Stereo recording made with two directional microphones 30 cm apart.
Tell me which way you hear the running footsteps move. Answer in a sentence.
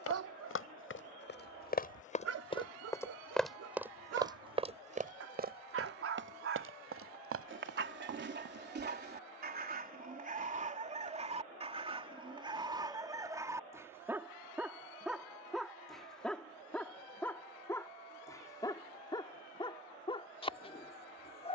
In this clip you hear the running footsteps travel towards the right.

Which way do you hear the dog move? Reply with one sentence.
You can hear the dog go from the right side to the left.